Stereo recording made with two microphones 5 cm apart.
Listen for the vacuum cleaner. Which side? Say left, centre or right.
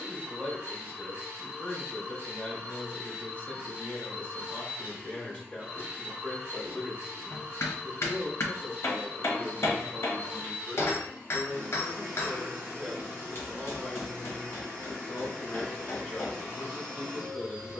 right.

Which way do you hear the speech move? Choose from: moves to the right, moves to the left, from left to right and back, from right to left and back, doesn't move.
from left to right and back.